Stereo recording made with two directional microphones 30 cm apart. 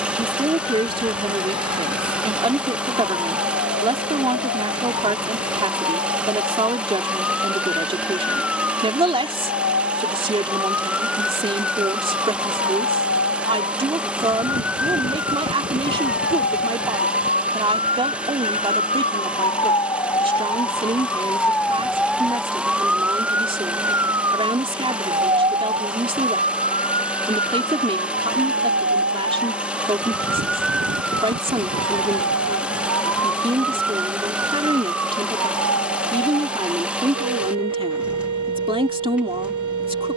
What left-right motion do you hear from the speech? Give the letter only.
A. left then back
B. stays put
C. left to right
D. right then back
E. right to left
B.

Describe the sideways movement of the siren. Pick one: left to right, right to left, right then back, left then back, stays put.
left to right.